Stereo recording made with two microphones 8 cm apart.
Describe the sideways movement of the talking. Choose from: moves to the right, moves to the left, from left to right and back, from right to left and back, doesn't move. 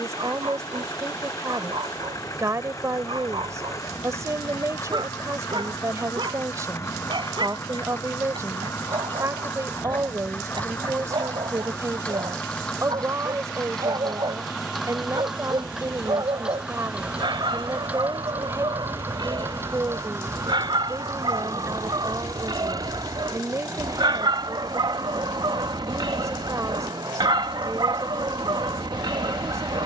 doesn't move.